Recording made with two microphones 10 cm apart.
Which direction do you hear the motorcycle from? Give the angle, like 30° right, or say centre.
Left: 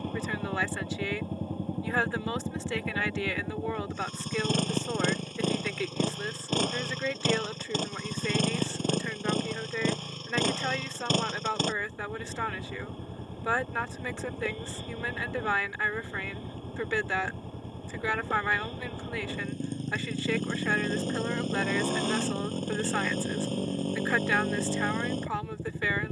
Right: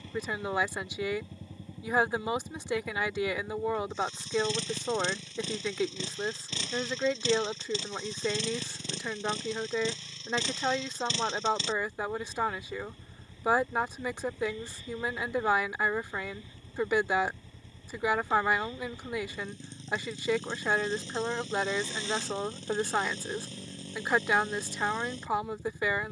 50° left.